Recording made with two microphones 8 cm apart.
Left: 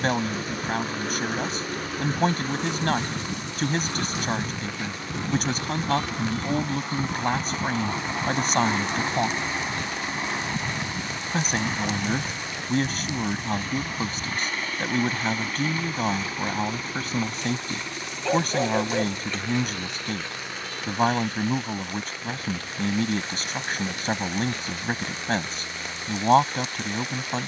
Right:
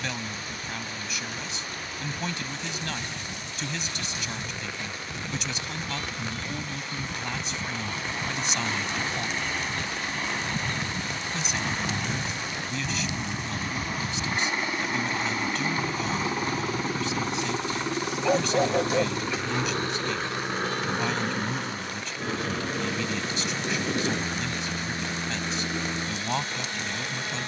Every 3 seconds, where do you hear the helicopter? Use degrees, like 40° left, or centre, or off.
60° left, 50° left, 30° left, 10° left, 10° right, 20° right, 40° right, 40° right, 50° right.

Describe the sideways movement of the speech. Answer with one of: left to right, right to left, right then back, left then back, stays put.
stays put.